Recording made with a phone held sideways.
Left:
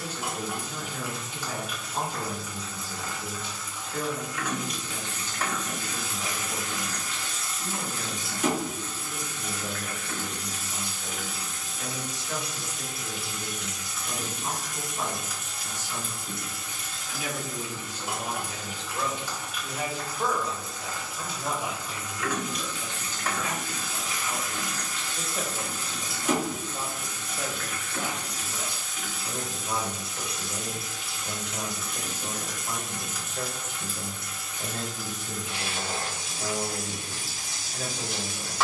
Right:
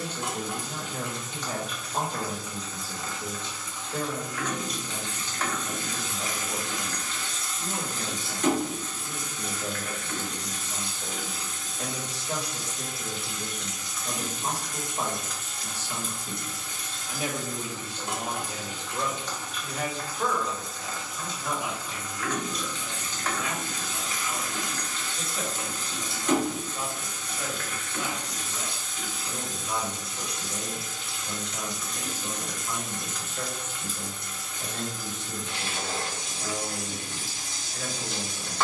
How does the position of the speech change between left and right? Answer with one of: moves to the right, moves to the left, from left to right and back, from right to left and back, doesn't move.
moves to the left.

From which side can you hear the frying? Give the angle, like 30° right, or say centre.
10° left.